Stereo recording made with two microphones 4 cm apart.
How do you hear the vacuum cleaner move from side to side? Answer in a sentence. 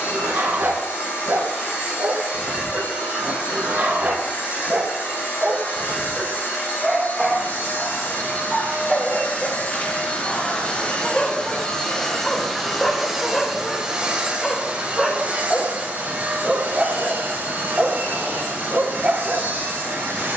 You can hear the vacuum cleaner move to the right.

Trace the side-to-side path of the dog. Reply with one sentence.
In this clip you hear the dog move from right to left and back again.